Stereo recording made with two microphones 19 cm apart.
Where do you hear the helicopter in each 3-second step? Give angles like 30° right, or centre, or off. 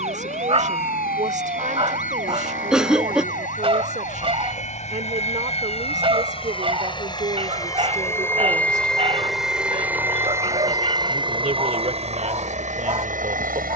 60° left, 40° left, 20° left, 20° right, 40° right.